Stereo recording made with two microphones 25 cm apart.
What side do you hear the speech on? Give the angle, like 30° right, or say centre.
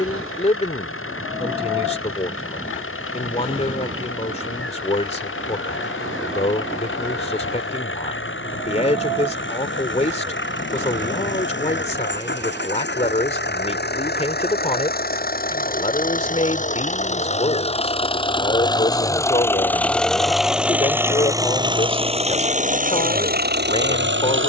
30° left.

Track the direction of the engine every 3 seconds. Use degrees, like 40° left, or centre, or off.
60° left, 60° left, 50° left, 50° left, 40° left, 30° left, 10° left, 30° right.